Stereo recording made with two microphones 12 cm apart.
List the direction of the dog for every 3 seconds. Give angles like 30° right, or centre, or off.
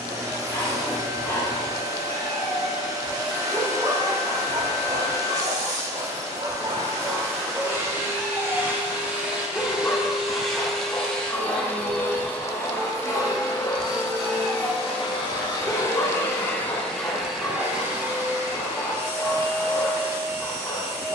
20° left, 40° right, 10° right, 20° left, 20° left, 20° left, 20° left.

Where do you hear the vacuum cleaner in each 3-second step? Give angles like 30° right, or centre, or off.
30° right, 30° right, 20° right, centre, 30° left, 10° left, 20° right.